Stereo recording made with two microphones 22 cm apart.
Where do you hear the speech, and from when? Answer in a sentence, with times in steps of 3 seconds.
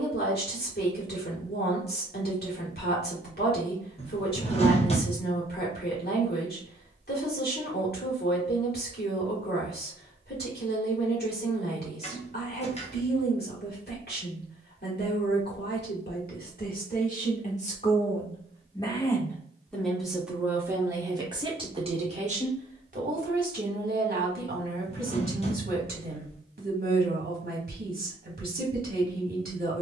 In this clip you hear the speech on the left from 0 s, in the centre from 18 s and on the right from 21 s.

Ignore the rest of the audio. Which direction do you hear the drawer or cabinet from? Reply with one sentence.
In this clip you hear the drawer or cabinet on the left.